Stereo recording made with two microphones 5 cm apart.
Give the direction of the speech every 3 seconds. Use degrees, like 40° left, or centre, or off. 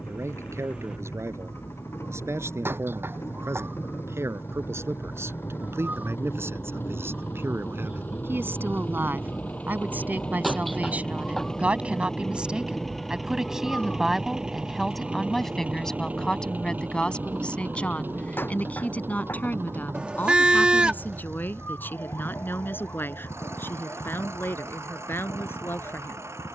70° right, 70° right, 60° right, 40° right, 10° right, 10° left, 30° left, 40° left, 50° left.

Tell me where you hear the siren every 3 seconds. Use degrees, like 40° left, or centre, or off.
60° right, 50° right, 30° right, centre, 20° left, 40° left, 50° left, 50° left, 60° left.